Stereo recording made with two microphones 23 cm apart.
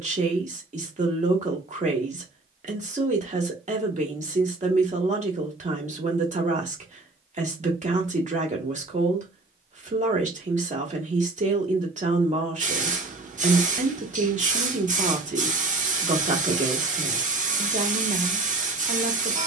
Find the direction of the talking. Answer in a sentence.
You can hear the talking on the right.